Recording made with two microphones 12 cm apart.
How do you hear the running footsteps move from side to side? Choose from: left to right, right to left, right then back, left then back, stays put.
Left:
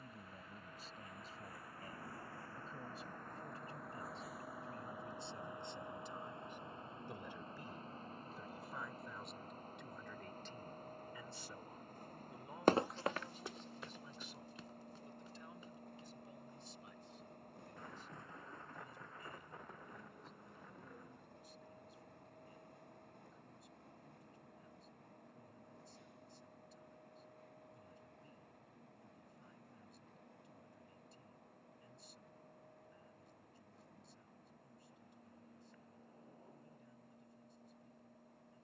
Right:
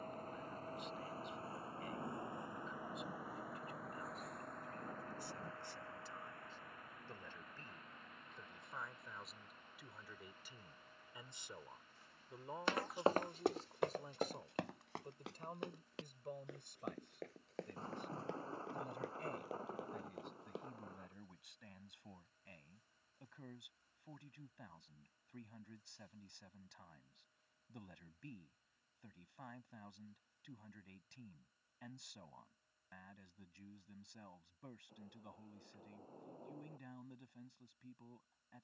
left to right.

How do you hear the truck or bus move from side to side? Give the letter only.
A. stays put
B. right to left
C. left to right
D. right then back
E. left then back
B.